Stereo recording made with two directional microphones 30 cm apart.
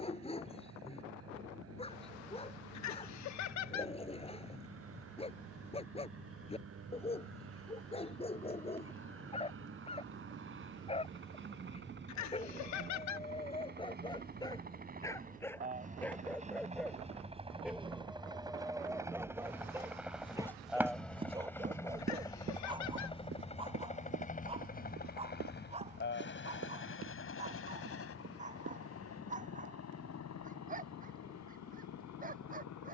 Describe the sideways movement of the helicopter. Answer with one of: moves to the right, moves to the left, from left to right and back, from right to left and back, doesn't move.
moves to the left.